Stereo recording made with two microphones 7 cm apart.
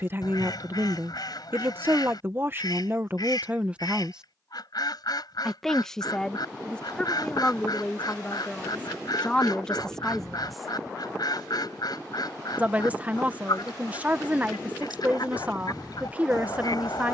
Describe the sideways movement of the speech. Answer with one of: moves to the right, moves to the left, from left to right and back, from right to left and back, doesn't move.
from right to left and back.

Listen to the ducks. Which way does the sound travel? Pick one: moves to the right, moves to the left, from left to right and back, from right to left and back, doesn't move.
doesn't move.